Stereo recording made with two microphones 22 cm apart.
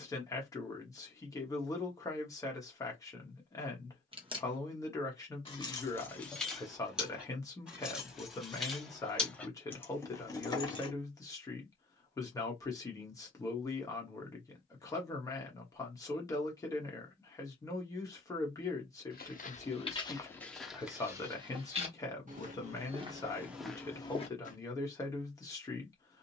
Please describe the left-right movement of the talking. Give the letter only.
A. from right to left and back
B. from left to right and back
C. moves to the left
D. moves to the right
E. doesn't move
E.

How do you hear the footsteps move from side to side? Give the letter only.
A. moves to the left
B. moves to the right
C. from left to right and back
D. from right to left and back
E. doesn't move
C.